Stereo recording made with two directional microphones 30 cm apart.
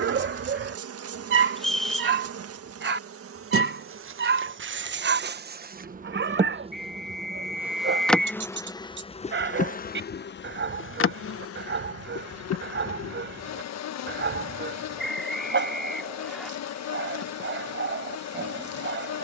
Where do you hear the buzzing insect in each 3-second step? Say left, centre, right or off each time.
right, right, centre, left, left, left, left.